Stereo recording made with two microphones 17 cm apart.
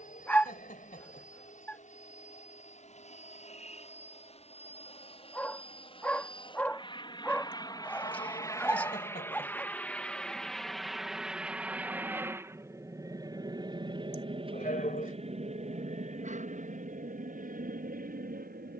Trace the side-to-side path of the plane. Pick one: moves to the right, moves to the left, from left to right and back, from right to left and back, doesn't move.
moves to the right.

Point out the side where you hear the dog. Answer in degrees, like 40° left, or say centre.
10° left.